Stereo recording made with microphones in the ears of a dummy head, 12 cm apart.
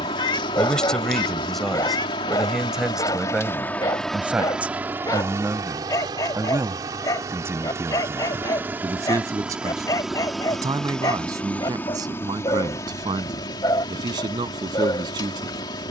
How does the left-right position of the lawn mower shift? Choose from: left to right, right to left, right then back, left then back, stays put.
right then back.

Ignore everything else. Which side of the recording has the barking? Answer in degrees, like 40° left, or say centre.
30° left.